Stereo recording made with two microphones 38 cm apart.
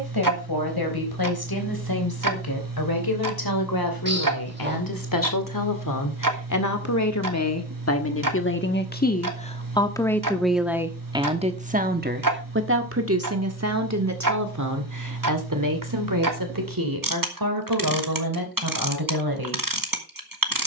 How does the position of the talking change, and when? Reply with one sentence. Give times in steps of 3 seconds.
You can hear the talking on the left from 0 s, in the centre from 9 s and on the right from 12 s.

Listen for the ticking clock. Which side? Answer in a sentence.
In this clip you hear the ticking clock on the right.